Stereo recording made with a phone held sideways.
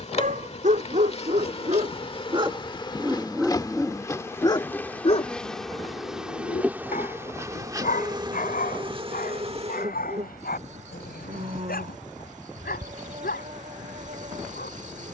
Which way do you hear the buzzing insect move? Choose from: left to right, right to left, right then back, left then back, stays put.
left to right.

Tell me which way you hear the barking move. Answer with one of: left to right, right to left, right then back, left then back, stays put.
right to left.